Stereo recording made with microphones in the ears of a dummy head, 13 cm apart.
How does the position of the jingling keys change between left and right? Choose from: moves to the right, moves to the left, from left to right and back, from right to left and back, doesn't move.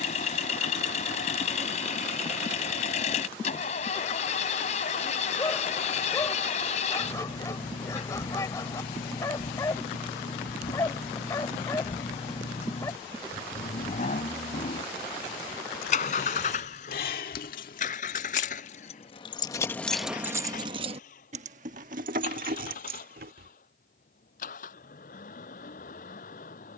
moves to the right.